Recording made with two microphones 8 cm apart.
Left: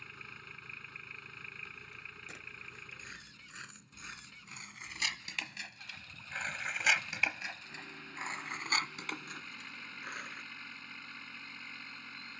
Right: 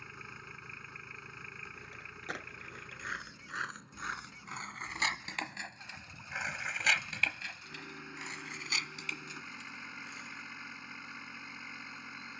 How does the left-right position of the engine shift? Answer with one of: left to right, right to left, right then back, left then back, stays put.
stays put.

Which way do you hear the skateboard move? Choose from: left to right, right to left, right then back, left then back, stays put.
right to left.